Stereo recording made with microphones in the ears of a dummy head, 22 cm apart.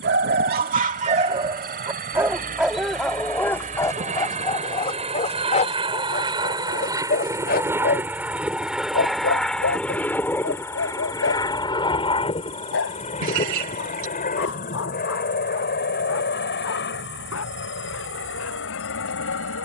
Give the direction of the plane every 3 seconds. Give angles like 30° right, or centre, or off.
40° right, 30° right, 10° right, 10° left, 30° left, 40° left, 50° left.